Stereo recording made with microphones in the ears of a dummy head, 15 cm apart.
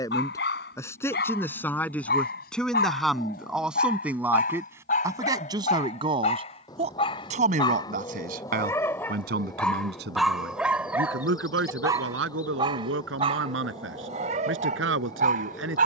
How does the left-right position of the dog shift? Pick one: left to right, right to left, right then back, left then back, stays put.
left to right.